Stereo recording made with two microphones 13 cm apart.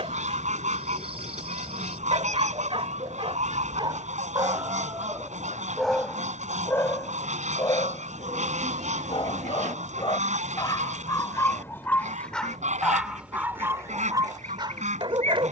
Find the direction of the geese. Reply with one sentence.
In this clip you hear the geese on the right.